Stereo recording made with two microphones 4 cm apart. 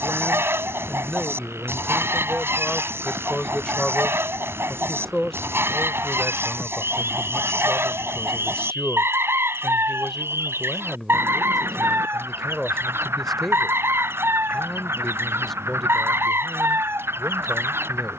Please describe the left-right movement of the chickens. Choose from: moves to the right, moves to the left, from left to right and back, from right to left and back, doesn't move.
doesn't move.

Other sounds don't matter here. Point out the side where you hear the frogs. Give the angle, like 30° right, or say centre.
80° right.